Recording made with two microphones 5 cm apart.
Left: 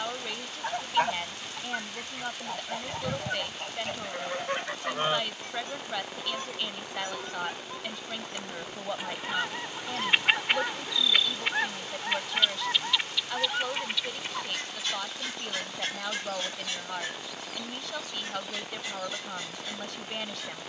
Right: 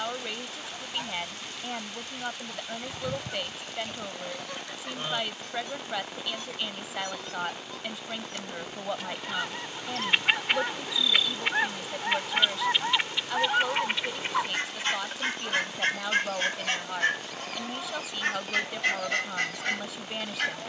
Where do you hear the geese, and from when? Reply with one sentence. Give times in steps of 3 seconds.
In this clip you hear the geese on the left from 0 s, in the centre from 9 s and on the right from 12 s.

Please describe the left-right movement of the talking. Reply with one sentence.
You can hear the talking stay in one place.